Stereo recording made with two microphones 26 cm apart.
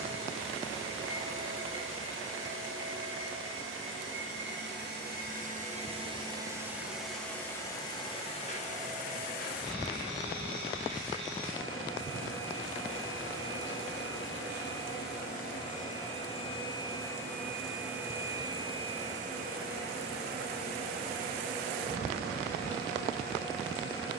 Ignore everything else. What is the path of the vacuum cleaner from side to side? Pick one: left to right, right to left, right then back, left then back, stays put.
left then back.